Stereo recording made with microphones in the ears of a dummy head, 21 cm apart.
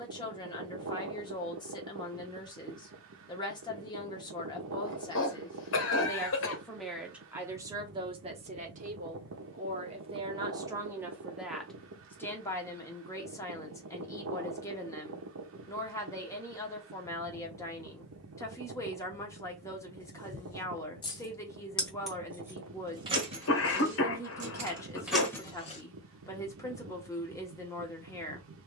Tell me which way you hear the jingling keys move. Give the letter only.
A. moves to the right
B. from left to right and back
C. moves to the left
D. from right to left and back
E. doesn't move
B.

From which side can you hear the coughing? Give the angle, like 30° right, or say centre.
60° left.